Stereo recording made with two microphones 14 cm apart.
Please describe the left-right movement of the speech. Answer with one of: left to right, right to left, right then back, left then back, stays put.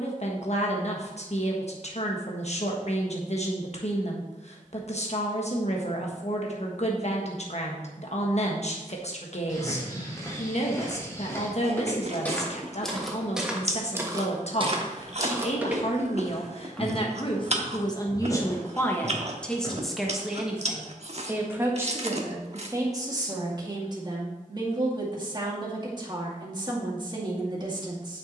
left to right.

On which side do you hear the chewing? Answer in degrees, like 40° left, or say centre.
50° right.